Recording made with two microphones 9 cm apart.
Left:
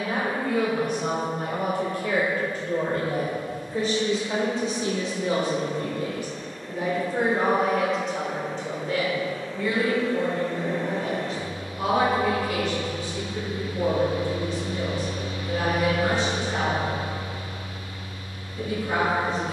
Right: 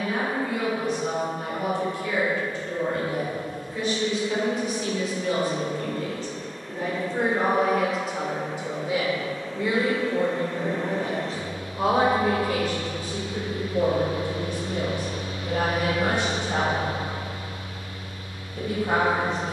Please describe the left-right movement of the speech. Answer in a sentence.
You can hear the speech go from the left side to the right.